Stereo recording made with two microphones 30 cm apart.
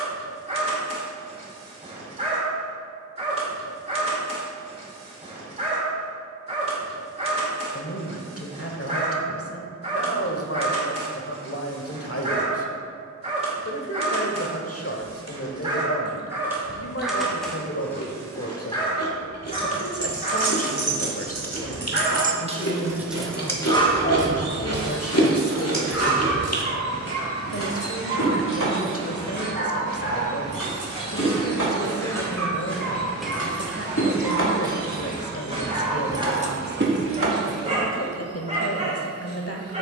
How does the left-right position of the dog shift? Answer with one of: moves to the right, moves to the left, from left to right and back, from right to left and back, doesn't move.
from right to left and back.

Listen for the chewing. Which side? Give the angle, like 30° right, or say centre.
50° left.